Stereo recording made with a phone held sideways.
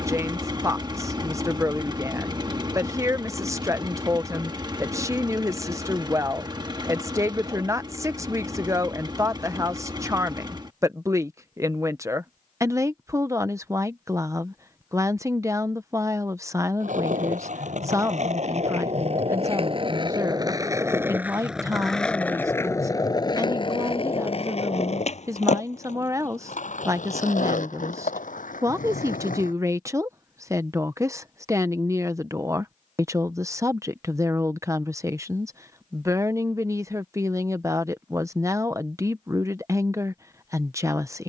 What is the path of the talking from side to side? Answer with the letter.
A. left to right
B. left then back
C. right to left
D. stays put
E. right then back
D.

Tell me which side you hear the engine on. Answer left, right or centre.
right.